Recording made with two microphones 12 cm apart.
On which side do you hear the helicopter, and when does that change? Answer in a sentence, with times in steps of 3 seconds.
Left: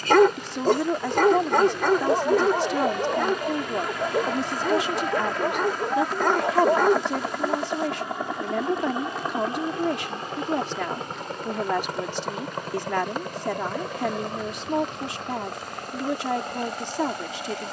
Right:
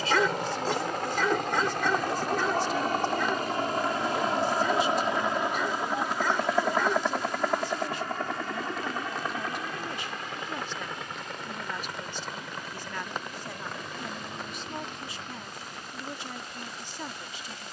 In this clip you hear the helicopter on the right from 0 s, in the centre from 6 s and on the left from 9 s.